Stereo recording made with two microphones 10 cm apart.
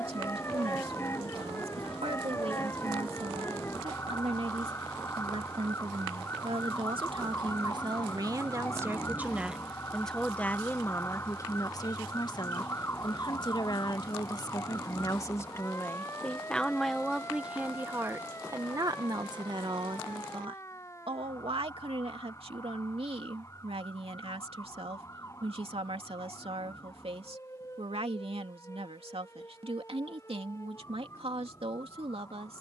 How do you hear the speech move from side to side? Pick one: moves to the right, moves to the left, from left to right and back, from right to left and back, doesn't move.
from right to left and back.